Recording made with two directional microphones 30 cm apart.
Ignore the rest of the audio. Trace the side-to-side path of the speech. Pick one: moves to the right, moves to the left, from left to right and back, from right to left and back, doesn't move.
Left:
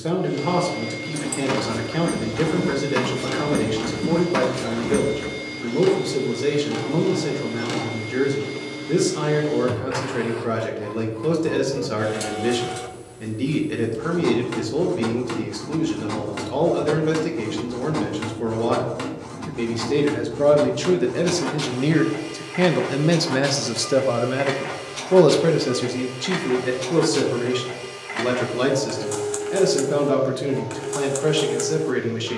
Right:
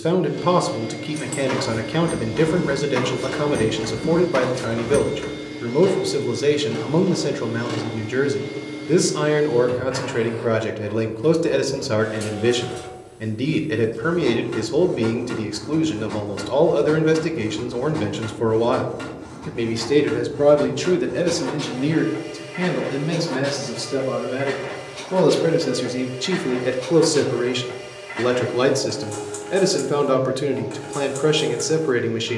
from right to left and back.